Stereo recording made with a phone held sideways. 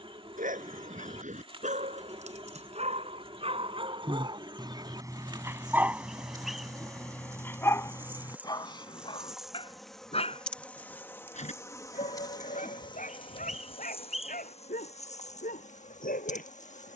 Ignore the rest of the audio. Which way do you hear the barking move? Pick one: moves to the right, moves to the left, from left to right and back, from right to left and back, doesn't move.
moves to the left.